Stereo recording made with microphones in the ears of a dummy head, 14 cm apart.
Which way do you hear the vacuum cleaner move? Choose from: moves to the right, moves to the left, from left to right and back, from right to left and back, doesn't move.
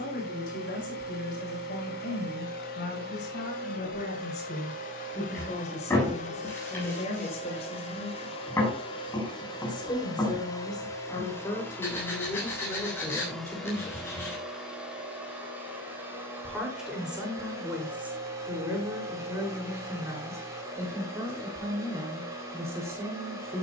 moves to the right.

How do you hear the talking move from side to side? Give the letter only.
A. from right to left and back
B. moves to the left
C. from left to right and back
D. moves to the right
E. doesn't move
D.